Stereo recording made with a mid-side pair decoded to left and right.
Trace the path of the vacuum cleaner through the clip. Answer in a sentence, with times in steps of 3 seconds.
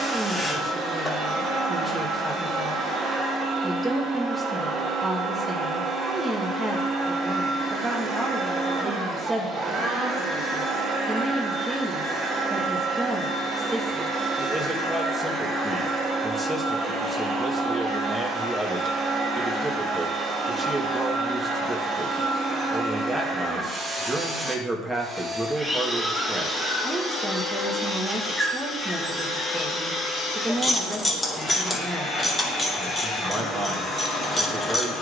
In this clip you hear the vacuum cleaner on the right from 0 s, in the centre from 24 s and on the left from 27 s.